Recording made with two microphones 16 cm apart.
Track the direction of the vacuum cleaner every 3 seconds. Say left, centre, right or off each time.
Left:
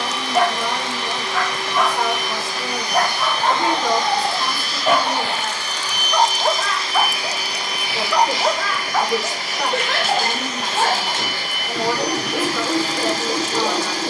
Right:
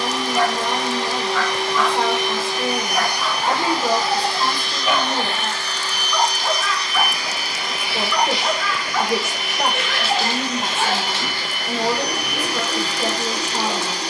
right, centre, left, left, left.